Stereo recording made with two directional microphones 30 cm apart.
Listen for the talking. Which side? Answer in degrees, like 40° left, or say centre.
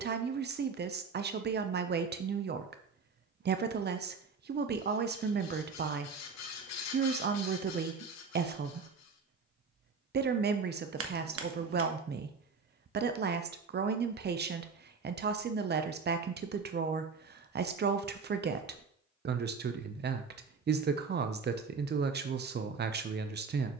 30° right.